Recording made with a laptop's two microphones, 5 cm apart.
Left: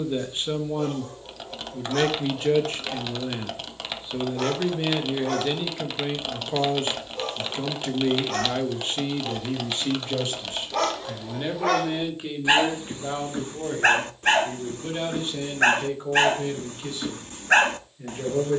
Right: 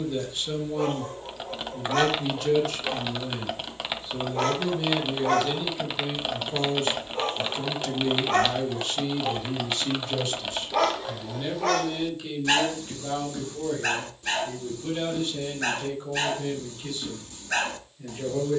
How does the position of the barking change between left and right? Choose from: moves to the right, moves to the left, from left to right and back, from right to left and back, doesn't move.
moves to the left.